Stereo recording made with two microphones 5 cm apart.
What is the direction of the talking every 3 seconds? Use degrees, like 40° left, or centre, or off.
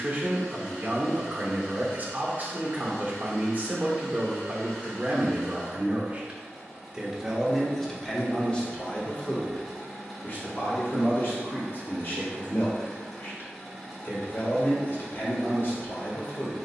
30° right, 30° right, centre, 50° left, 50° left, 50° left.